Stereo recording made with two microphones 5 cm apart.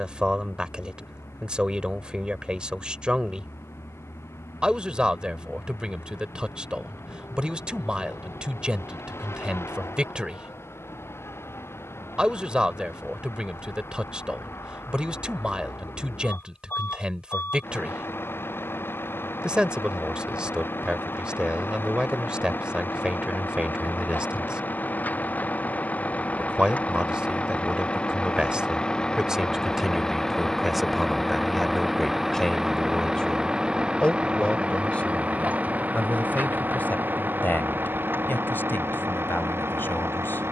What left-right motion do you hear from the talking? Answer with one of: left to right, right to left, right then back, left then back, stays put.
right to left.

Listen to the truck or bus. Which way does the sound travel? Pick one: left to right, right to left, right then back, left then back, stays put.
left to right.